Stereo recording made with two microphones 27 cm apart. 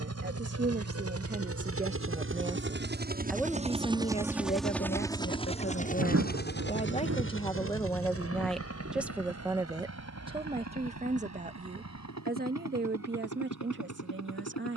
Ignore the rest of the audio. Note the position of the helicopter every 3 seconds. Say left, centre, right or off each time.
right, centre, left, left, left.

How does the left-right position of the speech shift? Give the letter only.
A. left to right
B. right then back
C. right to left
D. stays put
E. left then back
E.